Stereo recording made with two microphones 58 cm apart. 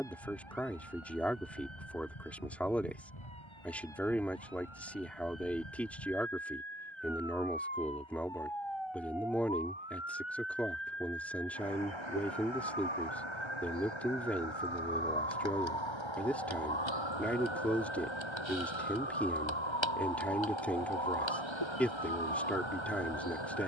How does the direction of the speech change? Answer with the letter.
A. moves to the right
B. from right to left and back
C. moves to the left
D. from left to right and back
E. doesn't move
E.